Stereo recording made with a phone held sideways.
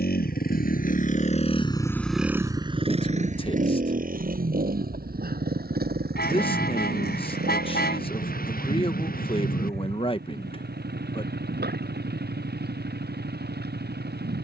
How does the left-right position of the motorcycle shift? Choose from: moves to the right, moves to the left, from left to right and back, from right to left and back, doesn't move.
moves to the right.